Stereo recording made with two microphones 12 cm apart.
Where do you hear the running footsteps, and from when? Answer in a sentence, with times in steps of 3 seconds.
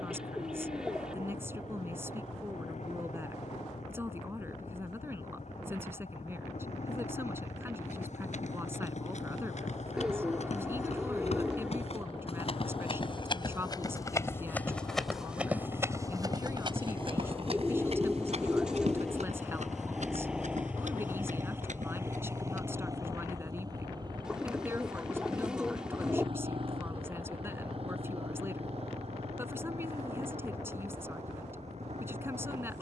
You can hear the running footsteps not at all from 0 s, on the left from 6 s, on the right from 15 s and not at all from 24 s.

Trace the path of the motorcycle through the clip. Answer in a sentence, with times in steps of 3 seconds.
In this clip you hear the motorcycle on the left from 0 s, in the centre from 18 s and on the right from 21 s.